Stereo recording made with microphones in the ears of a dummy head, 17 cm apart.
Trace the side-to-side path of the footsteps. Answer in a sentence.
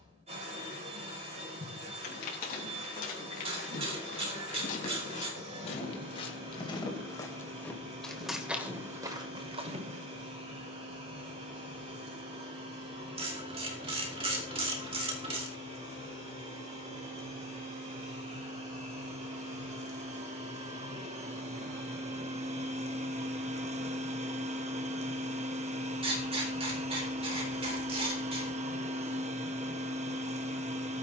You can hear the footsteps move from left to right.